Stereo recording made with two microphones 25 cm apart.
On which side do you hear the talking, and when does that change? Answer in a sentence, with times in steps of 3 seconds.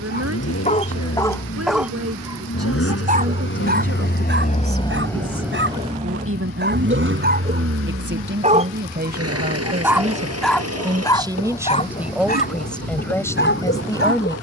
You can hear the talking on the right from 0 s and in the centre from 12 s.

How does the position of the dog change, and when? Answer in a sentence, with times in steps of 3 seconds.
In this clip you hear the dog in the centre from 0 s, on the right from 3 s, in the centre from 9 s and on the left from 12 s.